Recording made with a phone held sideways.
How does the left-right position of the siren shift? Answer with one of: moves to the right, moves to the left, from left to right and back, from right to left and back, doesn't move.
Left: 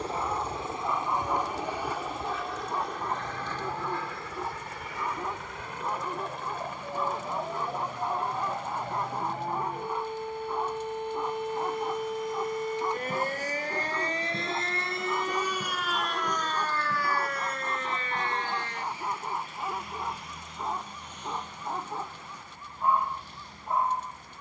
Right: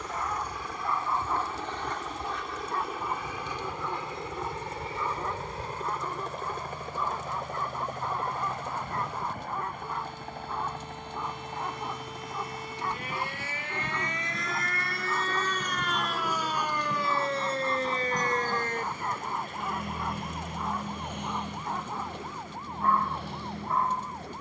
moves to the right.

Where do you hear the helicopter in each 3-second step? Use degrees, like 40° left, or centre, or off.
10° left, 20° right, 50° right, 60° right, 60° right, 70° right, 70° right, 70° right.